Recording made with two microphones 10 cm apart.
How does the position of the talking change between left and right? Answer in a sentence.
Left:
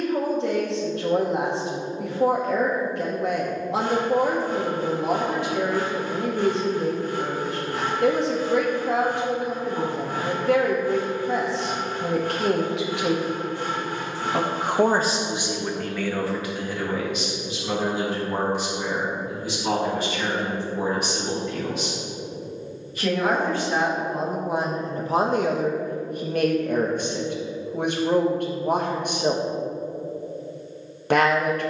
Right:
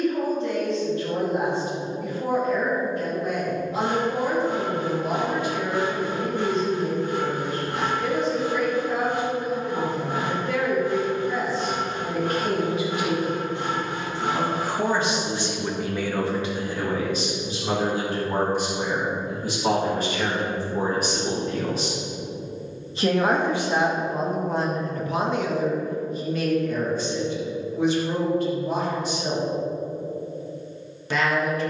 You can hear the talking go right and come back.